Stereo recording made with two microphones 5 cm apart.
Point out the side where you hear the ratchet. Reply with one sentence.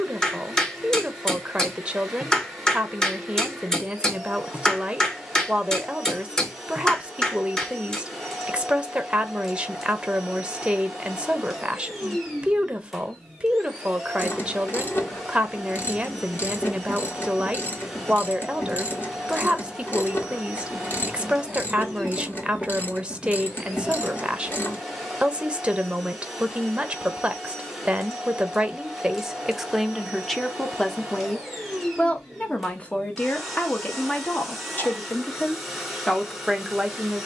In this clip you hear the ratchet on the left.